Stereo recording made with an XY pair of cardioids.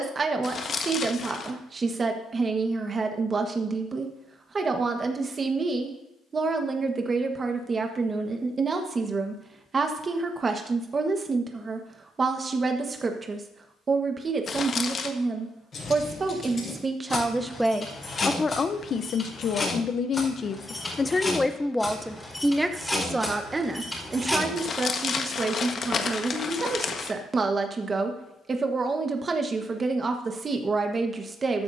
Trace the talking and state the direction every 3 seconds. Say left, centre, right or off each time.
right, right, right, right, right, right, left, centre, right, right, right.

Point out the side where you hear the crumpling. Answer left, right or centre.
left.